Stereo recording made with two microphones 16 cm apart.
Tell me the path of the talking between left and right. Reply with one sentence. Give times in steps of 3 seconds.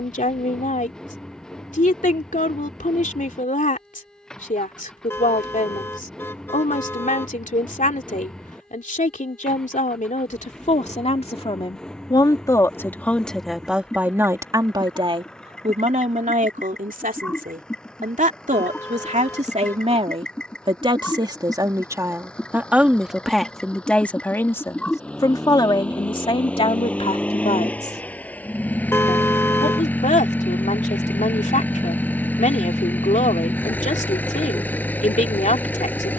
In this clip you hear the talking on the left from 0 s, in the centre from 12 s, on the right from 15 s, in the centre from 21 s and on the left from 24 s.